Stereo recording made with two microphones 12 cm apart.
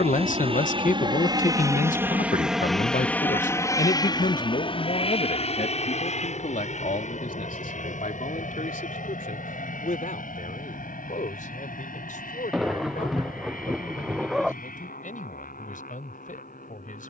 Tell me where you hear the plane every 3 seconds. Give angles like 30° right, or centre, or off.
30° right, 30° left, 60° left, 70° left, 70° left, 80° left.